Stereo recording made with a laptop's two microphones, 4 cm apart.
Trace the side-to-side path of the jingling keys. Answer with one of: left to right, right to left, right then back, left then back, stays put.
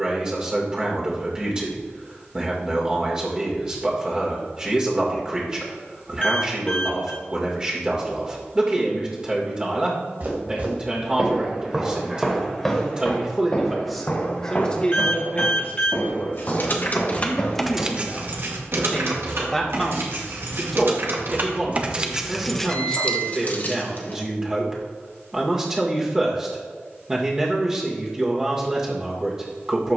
right then back.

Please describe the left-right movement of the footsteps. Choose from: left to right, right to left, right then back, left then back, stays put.
right to left.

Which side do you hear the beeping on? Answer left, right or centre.
left.